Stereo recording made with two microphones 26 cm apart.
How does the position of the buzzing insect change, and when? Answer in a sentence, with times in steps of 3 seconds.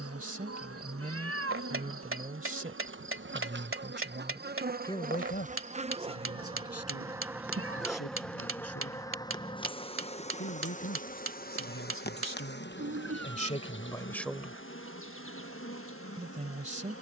You can hear the buzzing insect on the right from 0 s, in the centre from 6 s and on the left from 9 s.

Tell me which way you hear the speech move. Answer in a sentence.
You can hear the speech move from right to left and back again.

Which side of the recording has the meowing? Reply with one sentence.
You can hear the meowing on the right.